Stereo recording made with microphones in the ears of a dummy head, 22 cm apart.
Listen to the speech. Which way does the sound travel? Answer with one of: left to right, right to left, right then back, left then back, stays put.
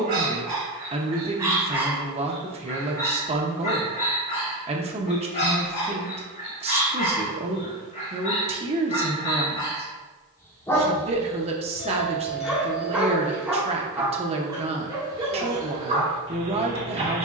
stays put.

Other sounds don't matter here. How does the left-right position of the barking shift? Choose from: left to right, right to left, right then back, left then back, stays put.
left then back.